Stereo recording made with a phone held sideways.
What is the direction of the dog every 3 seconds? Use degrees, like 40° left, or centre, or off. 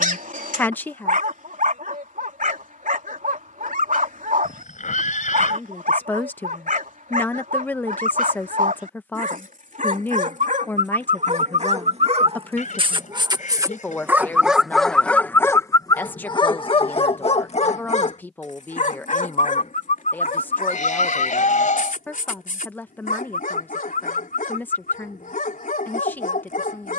60° right, 60° right, 60° right, 60° right, 20° right, 30° left, 60° left, 70° left, 70° left.